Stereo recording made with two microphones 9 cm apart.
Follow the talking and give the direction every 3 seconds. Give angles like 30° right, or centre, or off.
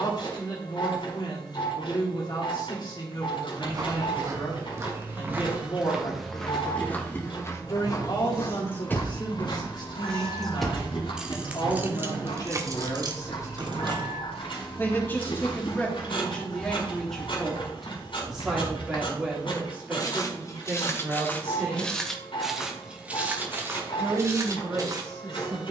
50° left, 50° left, 50° left, 50° left, 40° left, 10° left, 10° right, 20° right, 30° right.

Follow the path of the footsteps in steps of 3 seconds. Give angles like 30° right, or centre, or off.
off, 30° right, 30° left, 70° left, 80° left, 70° left, 50° left, centre, 30° right.